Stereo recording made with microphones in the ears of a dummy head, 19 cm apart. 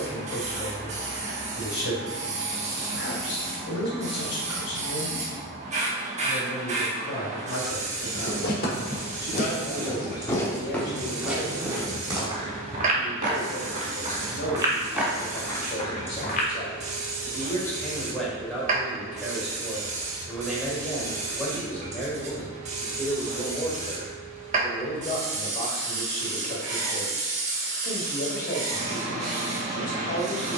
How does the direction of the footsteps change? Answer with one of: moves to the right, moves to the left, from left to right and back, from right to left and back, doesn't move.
from left to right and back.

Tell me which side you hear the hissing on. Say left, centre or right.
right.